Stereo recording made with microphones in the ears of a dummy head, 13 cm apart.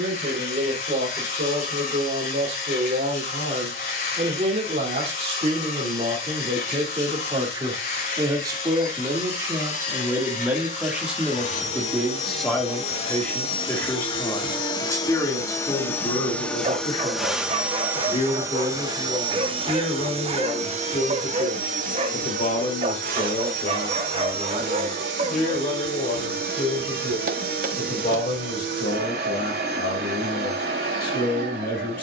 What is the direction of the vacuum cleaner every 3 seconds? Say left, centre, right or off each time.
left, left, left, left, left, centre, right, right, right, right, right.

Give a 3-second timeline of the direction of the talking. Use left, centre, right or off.
right, right, right, centre, centre, left, left, left, left, left, left.